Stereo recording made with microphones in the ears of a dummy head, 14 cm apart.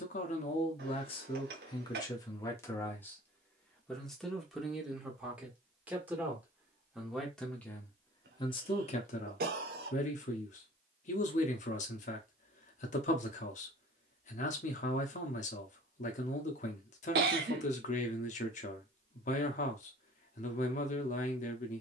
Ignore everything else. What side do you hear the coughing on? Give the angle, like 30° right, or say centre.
70° right.